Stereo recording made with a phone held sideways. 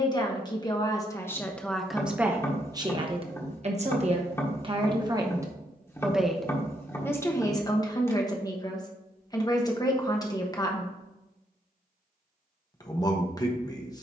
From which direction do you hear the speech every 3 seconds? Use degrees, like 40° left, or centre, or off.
10° left, 30° right, 20° left, 20° left, 20° left.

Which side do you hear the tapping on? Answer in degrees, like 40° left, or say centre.
20° left.